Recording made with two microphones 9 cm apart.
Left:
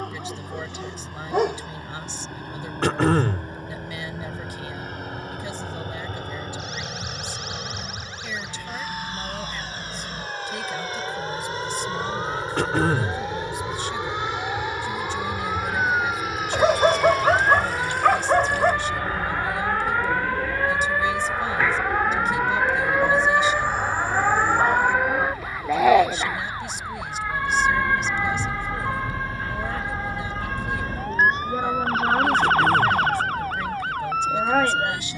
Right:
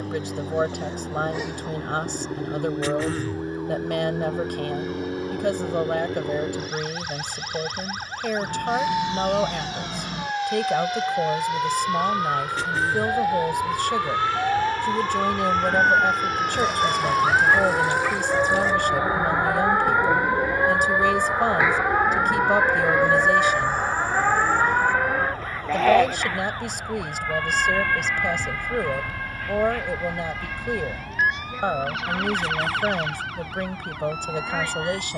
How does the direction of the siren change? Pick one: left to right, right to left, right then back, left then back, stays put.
right to left.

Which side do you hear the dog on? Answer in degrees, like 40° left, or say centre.
70° left.